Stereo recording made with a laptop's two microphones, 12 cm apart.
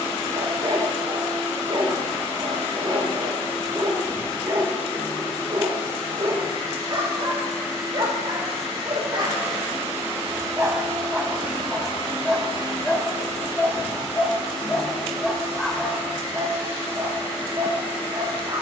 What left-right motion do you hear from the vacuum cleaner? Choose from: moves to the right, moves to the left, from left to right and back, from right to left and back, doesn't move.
from left to right and back.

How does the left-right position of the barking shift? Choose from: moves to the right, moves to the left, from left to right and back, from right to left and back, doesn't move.
from right to left and back.